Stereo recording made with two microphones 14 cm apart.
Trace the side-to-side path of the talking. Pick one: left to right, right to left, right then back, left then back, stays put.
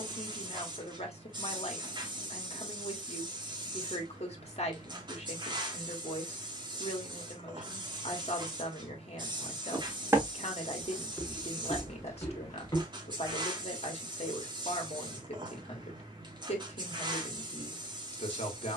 stays put.